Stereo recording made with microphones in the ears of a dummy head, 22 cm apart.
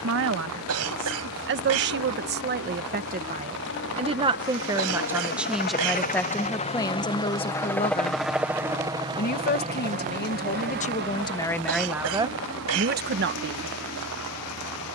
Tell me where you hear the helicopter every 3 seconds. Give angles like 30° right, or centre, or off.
60° left, 50° left, 10° left, 40° right, 60° right.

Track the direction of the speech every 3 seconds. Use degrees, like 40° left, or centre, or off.
50° right, 20° right, 20° left, 30° left, 40° right.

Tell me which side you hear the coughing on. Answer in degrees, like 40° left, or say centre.
70° right.